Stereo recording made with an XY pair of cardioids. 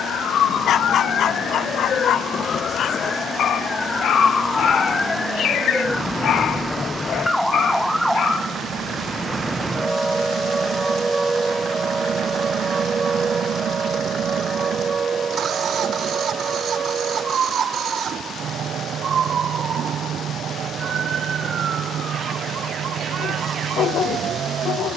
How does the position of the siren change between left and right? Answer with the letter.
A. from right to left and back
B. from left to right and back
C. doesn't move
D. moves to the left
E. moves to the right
E.